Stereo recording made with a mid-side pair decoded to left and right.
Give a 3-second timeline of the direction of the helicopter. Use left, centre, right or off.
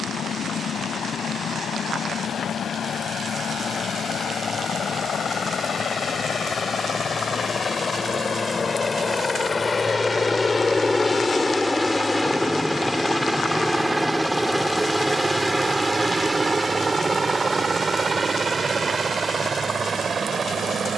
left, left, left, left, centre, right, right.